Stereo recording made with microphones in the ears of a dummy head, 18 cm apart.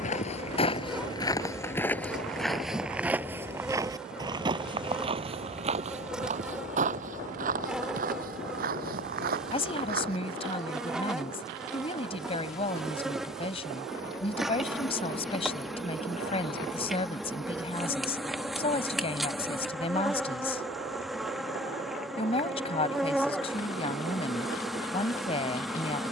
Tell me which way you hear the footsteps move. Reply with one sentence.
You can hear the footsteps move to the right.